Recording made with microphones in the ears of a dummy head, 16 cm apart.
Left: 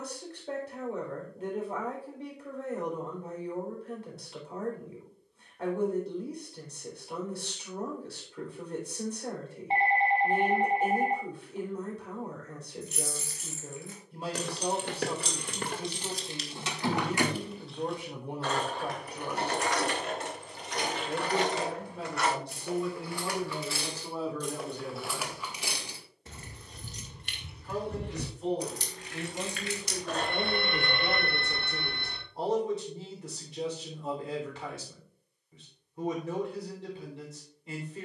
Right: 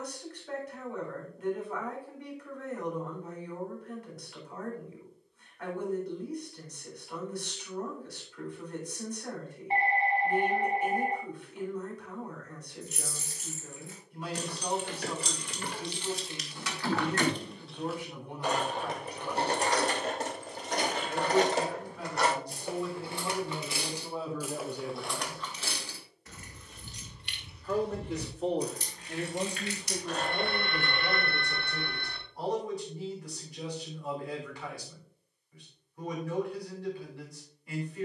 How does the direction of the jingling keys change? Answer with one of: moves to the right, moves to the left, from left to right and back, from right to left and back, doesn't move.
from left to right and back.